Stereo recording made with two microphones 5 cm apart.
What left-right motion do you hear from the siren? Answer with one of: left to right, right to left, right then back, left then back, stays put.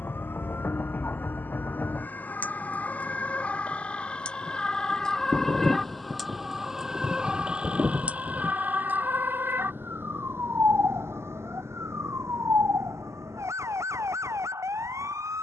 left to right.